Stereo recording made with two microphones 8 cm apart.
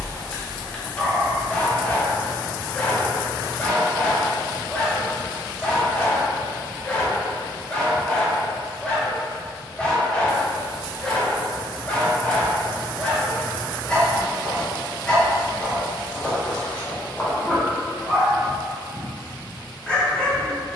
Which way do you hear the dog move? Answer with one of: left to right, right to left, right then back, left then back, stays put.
stays put.